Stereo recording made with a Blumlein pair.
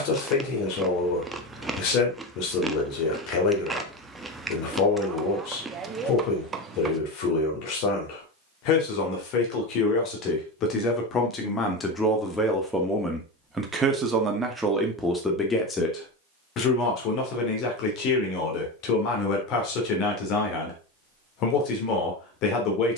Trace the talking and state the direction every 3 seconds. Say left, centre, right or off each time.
left, left, left, left, centre, left, left, left.